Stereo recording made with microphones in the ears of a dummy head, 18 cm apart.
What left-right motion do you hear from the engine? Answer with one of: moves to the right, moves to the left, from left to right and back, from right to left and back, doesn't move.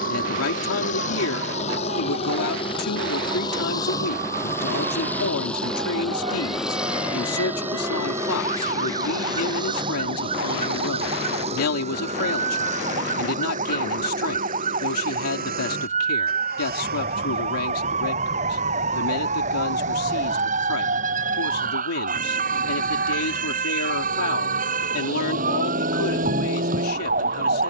moves to the right.